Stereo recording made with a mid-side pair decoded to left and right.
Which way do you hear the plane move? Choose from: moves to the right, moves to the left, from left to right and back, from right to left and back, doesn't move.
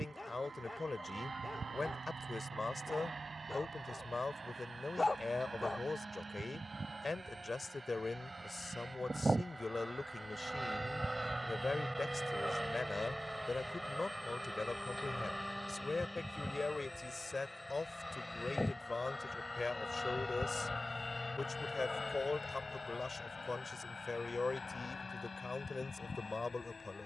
moves to the left.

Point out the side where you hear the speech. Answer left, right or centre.
left.